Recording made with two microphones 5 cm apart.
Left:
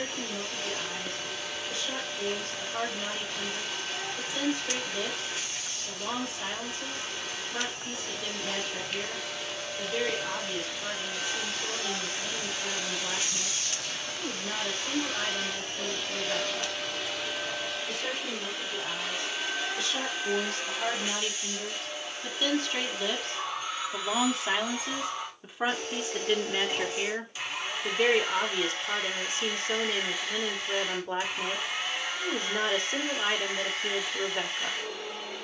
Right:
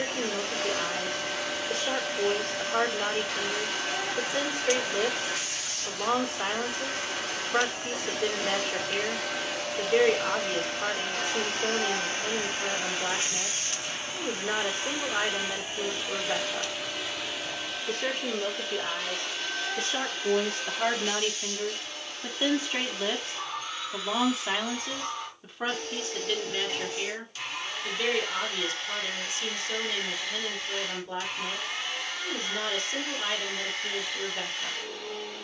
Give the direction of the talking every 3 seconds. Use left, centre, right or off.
right, right, right, right, right, right, right, right, centre, left, left, left.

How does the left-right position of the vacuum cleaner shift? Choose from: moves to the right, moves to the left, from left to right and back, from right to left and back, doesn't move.
moves to the left.